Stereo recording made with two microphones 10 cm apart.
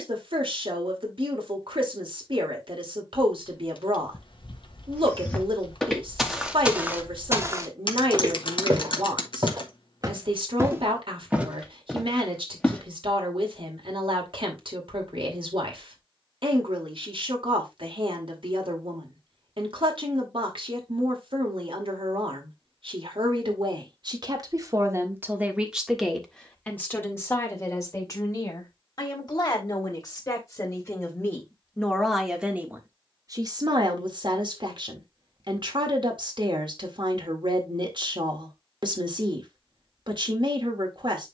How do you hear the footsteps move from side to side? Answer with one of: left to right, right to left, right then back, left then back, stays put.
right then back.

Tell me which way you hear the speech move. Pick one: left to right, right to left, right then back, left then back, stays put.
left then back.